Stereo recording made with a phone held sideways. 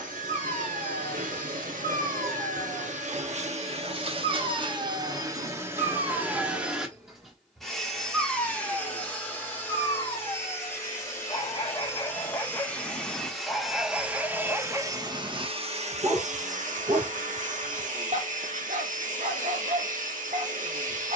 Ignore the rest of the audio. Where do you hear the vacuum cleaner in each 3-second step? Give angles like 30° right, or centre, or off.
80° right, 40° right, centre, 20° left, centre, 60° right, 70° right.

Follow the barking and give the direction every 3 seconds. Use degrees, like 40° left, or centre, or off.
60° right, 60° right, 10° right, 30° left, centre, 40° right, 60° right.